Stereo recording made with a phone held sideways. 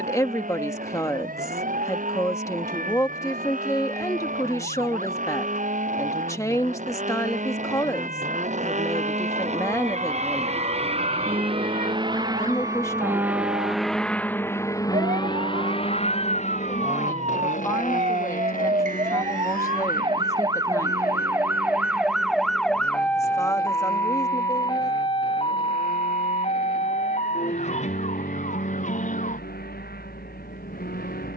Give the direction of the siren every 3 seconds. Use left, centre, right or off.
right, right, right, right, right, right, right, centre, left, left, left.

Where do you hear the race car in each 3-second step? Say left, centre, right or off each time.
right, right, right, right, centre, left, left, left, left, left, left.